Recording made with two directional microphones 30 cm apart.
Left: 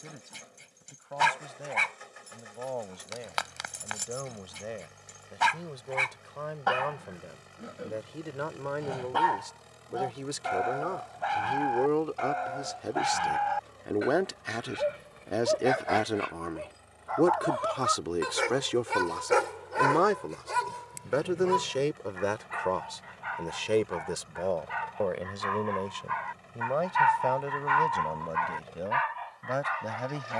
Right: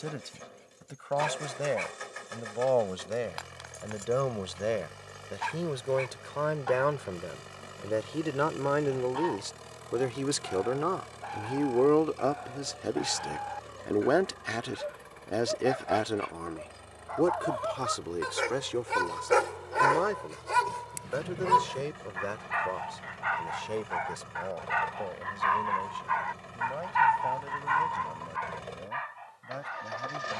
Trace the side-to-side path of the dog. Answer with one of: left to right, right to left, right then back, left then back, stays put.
right then back.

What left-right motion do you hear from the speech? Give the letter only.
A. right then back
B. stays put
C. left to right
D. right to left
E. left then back
D.